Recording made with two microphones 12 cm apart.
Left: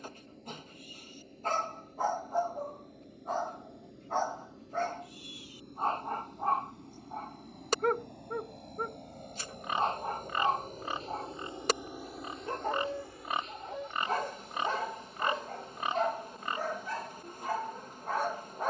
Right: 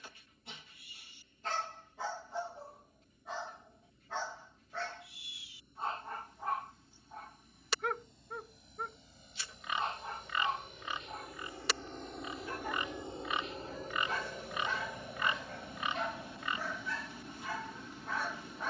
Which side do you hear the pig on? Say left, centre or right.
left.